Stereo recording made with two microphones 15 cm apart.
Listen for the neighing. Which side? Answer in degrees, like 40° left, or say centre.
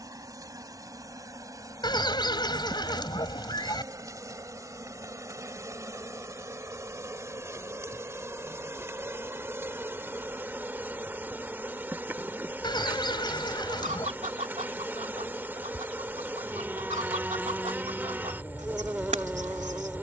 30° left.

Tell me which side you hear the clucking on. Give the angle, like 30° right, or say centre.
50° right.